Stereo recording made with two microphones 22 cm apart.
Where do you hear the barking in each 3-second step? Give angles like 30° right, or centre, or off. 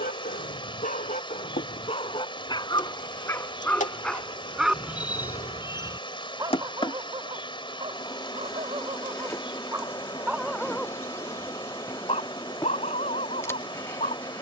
30° left, centre, 20° right, centre, 30° left.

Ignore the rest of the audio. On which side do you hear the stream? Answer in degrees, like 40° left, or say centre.
20° left.